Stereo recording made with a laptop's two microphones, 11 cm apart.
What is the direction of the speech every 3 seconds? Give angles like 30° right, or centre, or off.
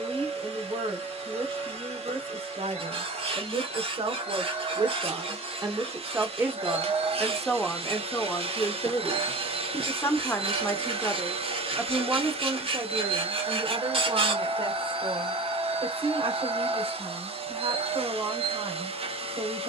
70° right, 50° right, centre, 20° left, 40° right, 60° right, 60° right.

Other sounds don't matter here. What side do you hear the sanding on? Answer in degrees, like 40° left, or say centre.
60° right.